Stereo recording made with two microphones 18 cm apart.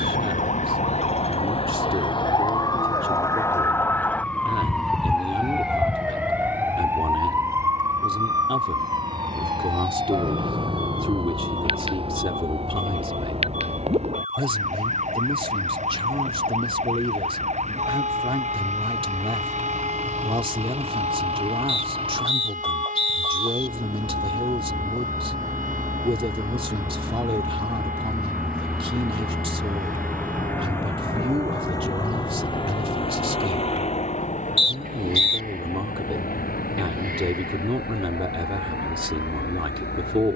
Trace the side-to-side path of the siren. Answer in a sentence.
In this clip you hear the siren move to the right.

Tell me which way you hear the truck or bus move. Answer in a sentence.
In this clip you hear the truck or bus move to the left.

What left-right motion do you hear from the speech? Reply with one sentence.
In this clip you hear the speech stay in one place.